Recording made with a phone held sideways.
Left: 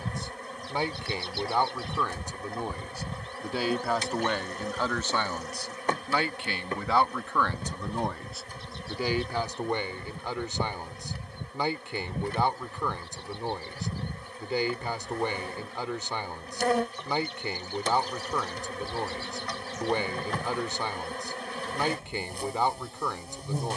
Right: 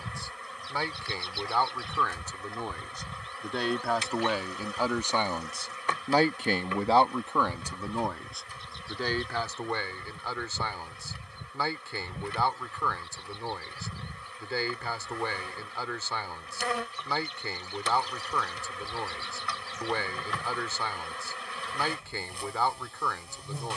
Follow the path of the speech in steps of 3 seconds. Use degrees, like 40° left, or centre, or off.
20° left, 10° right, 20° right, 20° left, 20° left, 20° left, 20° left, 20° left.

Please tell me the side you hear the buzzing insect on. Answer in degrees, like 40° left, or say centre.
40° left.